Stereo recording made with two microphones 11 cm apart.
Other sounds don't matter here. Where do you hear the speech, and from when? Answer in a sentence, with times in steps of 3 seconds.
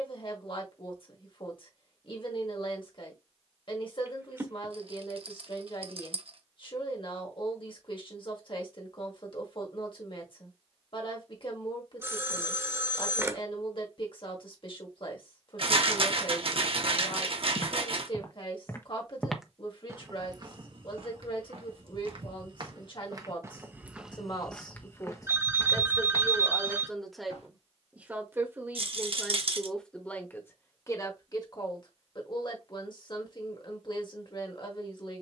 You can hear the speech on the left from 0 s, in the centre from 27 s and on the left from 30 s.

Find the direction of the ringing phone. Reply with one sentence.
In this clip you hear the ringing phone on the right.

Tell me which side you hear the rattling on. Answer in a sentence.
In this clip you hear the rattling on the right.